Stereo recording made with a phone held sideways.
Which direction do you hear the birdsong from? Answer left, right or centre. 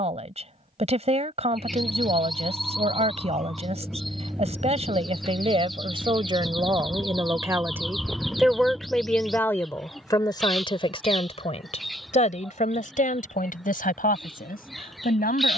centre.